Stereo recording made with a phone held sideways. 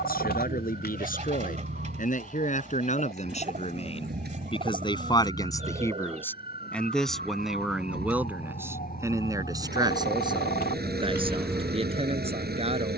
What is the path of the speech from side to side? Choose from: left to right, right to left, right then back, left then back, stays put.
left to right.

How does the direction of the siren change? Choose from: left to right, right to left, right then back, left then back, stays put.
left to right.